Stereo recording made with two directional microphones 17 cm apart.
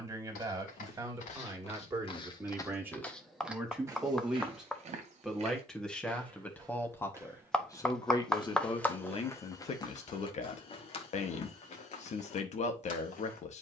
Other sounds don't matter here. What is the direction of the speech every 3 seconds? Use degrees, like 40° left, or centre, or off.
20° right, centre, 20° left, 40° left, 40° left.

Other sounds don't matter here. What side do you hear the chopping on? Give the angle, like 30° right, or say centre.
centre.